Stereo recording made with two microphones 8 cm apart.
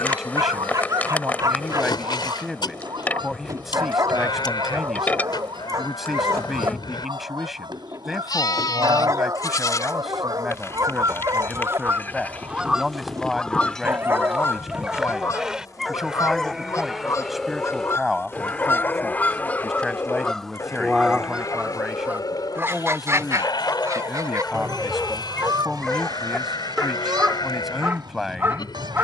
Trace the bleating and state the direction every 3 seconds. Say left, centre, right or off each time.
left, left, left, left, centre, centre, left, left, left, left.